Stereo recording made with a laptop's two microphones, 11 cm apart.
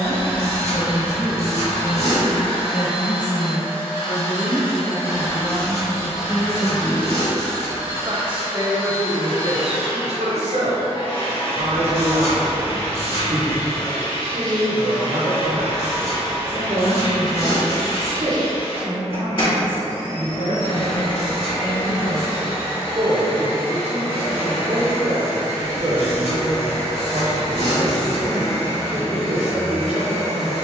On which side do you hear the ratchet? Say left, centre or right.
left.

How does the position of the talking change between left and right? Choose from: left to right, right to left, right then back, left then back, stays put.
left to right.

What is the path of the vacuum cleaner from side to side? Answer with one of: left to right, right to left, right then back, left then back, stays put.
stays put.